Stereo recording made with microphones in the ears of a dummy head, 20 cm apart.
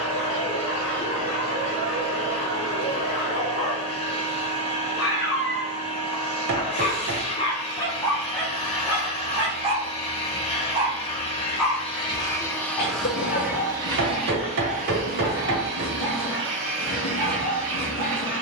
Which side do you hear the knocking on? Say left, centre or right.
right.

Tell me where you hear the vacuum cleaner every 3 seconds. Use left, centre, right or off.
left, left, left, left, centre, right.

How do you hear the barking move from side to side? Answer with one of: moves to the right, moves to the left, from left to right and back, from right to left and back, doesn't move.
from left to right and back.